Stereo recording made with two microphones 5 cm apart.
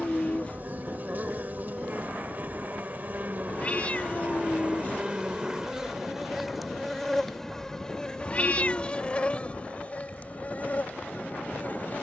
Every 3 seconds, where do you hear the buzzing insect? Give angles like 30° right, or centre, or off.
40° right, 30° right, 10° left, 40° left.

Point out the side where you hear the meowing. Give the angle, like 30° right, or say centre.
30° left.